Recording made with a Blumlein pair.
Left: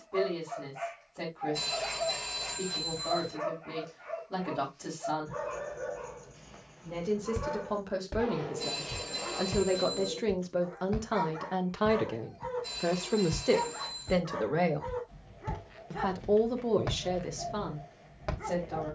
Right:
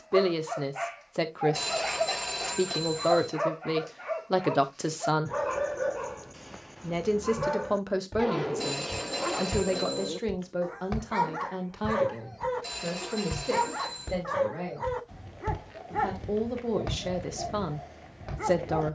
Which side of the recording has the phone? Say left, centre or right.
right.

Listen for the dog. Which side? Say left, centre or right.
right.